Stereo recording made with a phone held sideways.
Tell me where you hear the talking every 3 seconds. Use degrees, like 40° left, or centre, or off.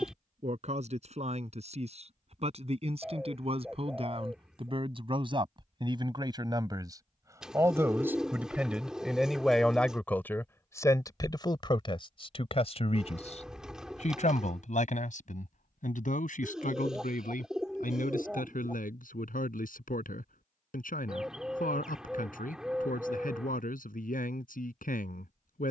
50° right, 40° right, 20° right, 20° left, 50° left, 70° left, 80° left, 80° left, 80° left.